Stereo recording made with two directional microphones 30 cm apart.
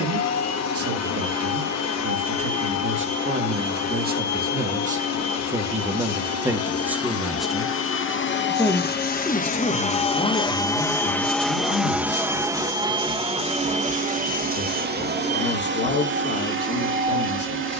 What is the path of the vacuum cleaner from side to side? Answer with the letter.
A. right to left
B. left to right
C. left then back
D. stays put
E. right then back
B.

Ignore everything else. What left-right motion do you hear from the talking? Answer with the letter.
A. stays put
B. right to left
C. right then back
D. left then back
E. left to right
B.